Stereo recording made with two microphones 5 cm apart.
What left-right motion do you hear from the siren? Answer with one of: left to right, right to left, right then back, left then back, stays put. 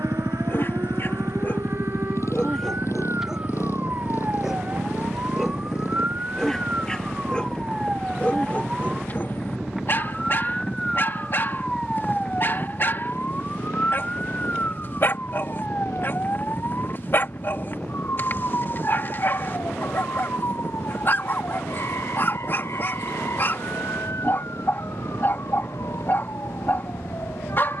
right to left.